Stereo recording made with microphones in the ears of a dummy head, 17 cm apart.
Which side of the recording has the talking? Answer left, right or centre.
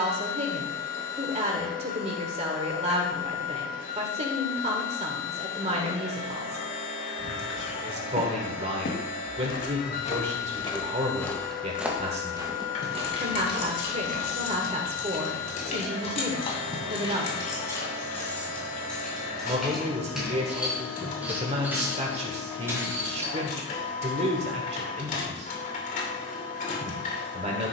right.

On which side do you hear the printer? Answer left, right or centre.
left.